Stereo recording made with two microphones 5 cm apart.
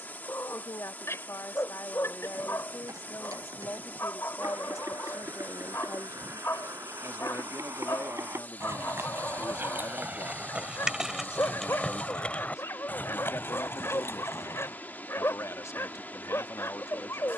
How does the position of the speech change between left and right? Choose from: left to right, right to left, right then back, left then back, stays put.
stays put.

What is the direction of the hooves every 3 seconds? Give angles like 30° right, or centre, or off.
70° right, 70° right, 60° right, 20° right, 40° left, off.